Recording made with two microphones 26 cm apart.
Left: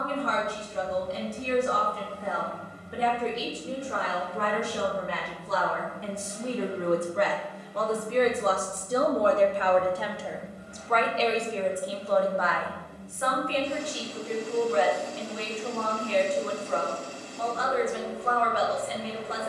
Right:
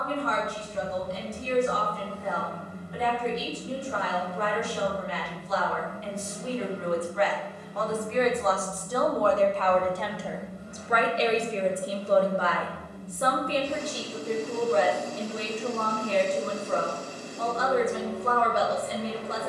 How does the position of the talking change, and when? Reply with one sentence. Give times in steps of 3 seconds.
In this clip you hear the talking on the left from 0 s, in the centre from 9 s and on the right from 12 s.